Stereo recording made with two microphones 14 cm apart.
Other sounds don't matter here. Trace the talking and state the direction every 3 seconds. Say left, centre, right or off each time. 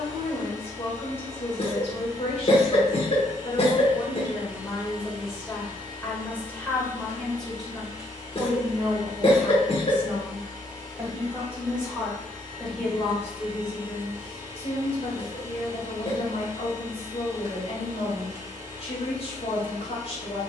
left, left, centre, centre, left, left, left.